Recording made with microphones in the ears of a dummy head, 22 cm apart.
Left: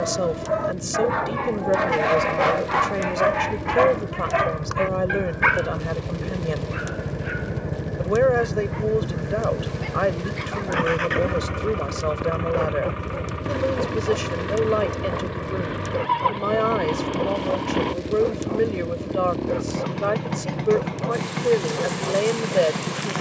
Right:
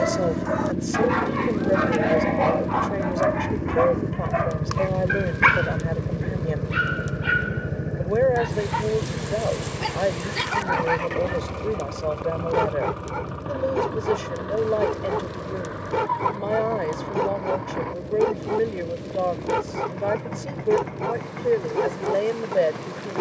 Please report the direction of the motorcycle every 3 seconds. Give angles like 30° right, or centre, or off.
60° right, 40° right, 10° right, 20° left, 30° left, 40° left, 50° left, 50° left.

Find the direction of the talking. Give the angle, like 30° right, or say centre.
10° left.